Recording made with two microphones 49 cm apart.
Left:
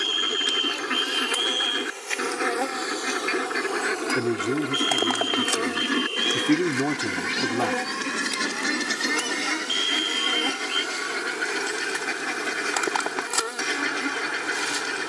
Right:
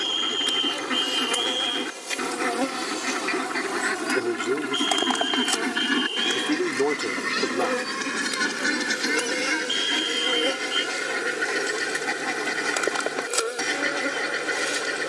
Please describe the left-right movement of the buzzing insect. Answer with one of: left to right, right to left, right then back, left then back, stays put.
right to left.